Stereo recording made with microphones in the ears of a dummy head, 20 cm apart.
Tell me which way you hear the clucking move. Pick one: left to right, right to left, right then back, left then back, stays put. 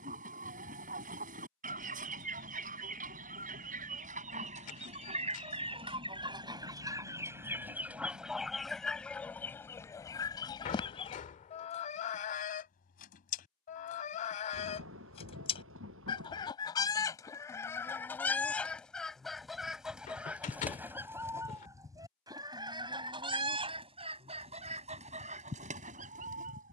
left then back.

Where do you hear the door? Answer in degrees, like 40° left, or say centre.
40° left.